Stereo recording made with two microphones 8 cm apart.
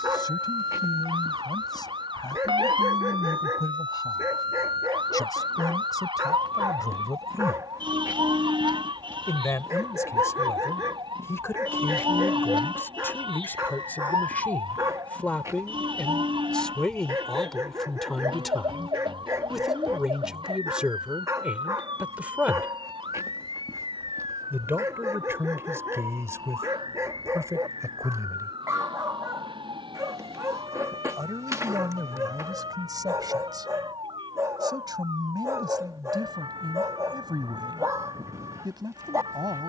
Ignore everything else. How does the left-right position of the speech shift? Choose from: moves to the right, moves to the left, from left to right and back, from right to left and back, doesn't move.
moves to the right.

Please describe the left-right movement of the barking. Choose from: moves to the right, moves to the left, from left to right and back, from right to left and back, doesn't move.
doesn't move.